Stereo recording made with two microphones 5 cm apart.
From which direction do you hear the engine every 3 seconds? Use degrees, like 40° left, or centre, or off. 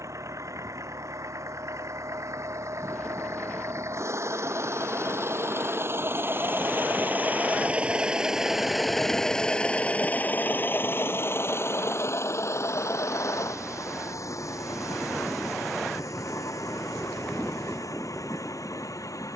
70° right, 60° right, 30° right, 30° left, 60° left, 70° left, 80° left.